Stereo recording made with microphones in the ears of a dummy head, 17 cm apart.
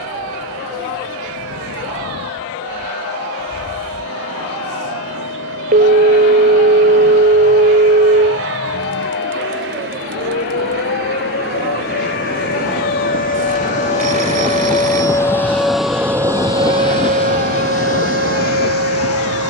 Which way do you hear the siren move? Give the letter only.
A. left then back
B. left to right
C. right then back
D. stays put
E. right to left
B.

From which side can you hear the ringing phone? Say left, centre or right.
right.